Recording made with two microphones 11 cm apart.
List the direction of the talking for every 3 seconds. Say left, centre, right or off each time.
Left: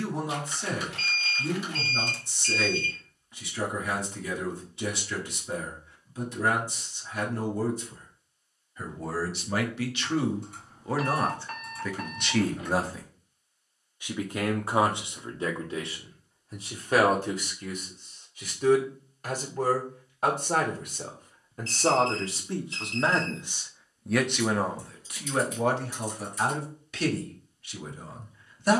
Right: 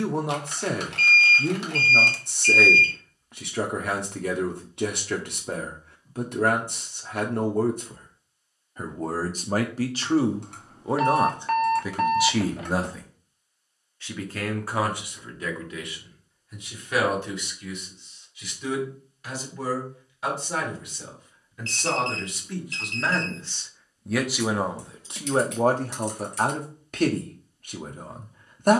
right, right, right, right, centre, left, left, left, right, right.